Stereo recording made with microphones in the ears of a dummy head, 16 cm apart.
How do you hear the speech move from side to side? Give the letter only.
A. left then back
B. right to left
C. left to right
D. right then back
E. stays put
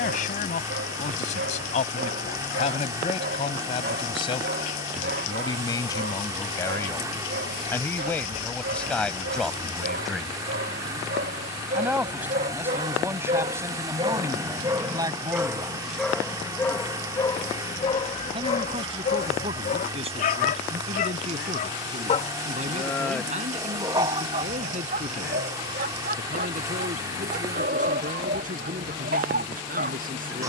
C.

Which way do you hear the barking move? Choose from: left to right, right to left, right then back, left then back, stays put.
left then back.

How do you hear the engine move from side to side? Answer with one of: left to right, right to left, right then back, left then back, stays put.
stays put.